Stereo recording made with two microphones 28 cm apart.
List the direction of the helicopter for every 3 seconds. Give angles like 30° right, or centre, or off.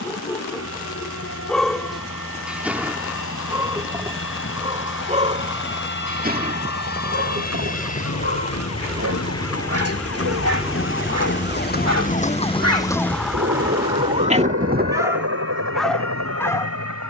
60° left, 50° left, 30° left, centre, 40° right, 70° right.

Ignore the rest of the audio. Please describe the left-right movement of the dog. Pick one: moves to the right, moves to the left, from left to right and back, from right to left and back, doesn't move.
from left to right and back.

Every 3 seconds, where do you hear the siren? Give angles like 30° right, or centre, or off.
80° left, 80° left, 70° left, 50° left, centre, 50° right.